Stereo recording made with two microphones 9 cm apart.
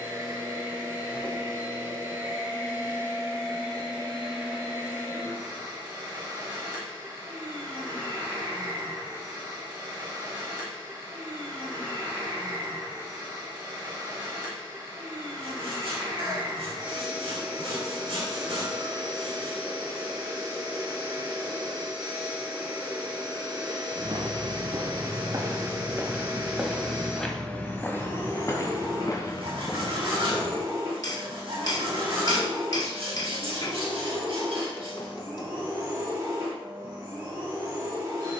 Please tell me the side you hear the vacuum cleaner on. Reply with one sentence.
In this clip you hear the vacuum cleaner on the right.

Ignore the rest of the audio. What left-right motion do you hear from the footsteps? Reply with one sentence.
In this clip you hear the footsteps move to the left.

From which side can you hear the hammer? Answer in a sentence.
In this clip you hear the hammer on the left.